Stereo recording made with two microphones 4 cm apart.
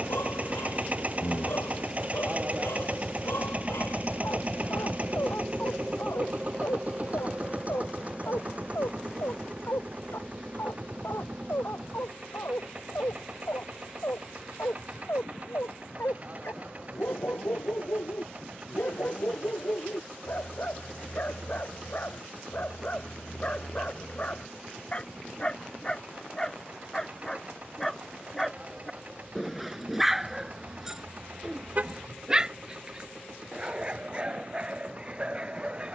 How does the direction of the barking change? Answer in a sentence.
You can hear the barking travel towards the right.